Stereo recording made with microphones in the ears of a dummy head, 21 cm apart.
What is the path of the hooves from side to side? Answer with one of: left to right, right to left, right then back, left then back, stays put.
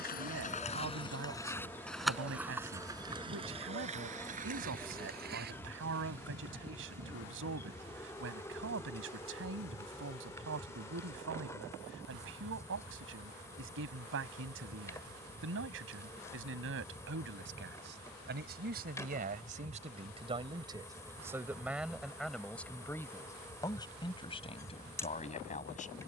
left to right.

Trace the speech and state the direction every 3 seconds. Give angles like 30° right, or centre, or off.
60° right, 60° right, 60° right, 60° right, 60° right, 60° right, 30° right, centre, 30° left.